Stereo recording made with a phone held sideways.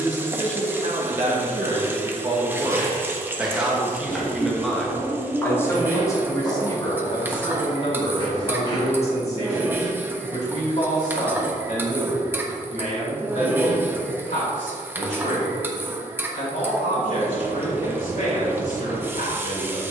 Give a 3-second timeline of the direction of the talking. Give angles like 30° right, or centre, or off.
40° right, centre, 40° left, 50° left, 60° left, 70° left, 70° left.